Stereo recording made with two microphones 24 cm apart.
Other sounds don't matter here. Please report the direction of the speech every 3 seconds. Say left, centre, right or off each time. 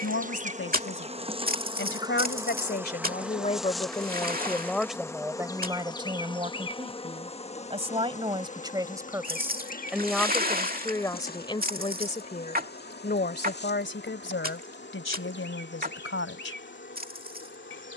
left, centre, right, centre, left, left.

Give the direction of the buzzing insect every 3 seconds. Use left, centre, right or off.
right, centre, left, left, left, left.